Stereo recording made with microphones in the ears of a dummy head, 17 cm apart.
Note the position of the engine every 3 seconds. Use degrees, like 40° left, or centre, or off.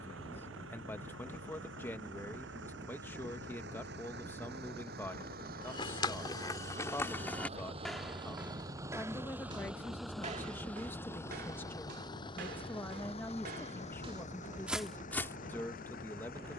70° right, 60° right, 30° right, centre, 30° left, 50° left.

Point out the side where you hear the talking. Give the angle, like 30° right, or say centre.
10° left.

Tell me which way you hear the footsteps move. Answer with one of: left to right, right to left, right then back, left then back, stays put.
right then back.